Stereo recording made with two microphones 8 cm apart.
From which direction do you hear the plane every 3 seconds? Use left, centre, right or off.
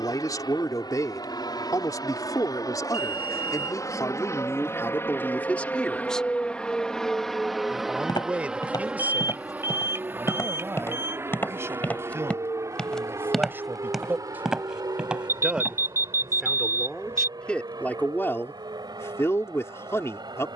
left, left, centre, right, right, right, right.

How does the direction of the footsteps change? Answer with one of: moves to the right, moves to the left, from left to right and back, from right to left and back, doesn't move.
moves to the right.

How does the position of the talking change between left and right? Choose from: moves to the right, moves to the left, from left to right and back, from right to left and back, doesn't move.
from left to right and back.